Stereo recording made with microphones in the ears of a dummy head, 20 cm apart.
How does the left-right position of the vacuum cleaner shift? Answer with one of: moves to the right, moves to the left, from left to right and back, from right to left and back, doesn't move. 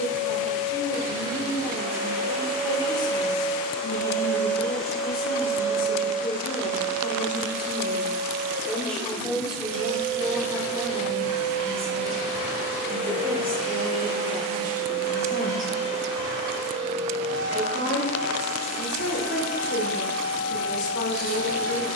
moves to the right.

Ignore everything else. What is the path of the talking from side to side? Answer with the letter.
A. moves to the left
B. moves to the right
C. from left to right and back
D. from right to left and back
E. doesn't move
C.